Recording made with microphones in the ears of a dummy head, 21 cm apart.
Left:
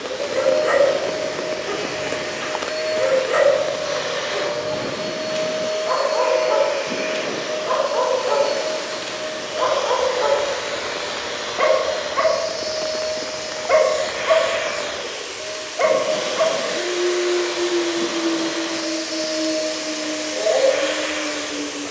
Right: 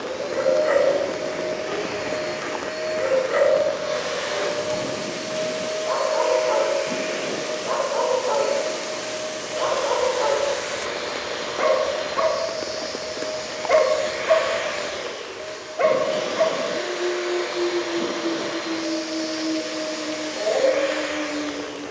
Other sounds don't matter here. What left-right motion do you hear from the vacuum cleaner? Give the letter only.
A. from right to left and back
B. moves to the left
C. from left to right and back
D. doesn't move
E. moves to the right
D.